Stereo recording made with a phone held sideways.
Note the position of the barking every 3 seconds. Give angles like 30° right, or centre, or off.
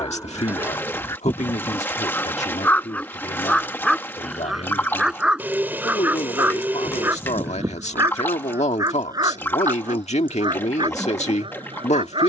10° left, centre, 20° right, 30° right.